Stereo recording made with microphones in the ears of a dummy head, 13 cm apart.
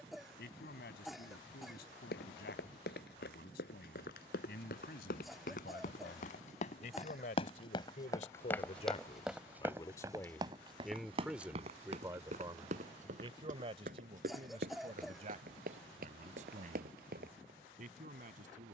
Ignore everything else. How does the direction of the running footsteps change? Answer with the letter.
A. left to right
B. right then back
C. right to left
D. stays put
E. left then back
A.